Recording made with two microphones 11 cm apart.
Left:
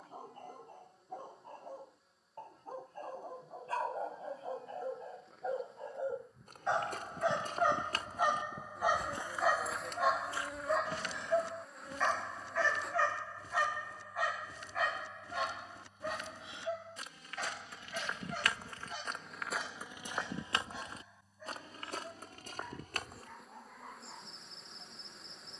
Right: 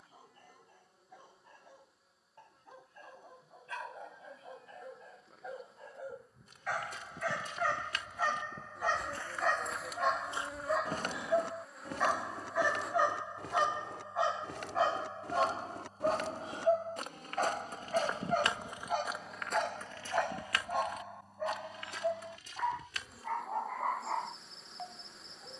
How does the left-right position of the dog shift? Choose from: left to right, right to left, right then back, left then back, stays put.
left to right.